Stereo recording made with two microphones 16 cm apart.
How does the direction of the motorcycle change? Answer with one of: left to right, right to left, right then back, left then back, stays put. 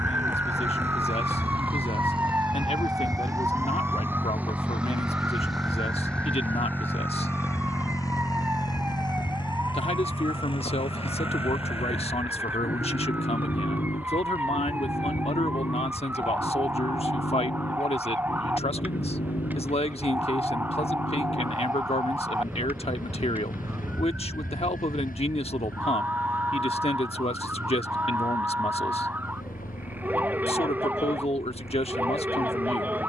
right to left.